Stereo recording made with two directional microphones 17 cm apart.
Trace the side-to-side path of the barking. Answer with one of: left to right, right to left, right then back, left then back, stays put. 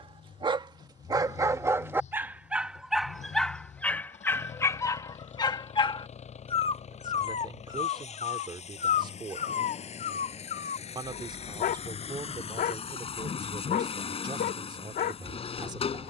right to left.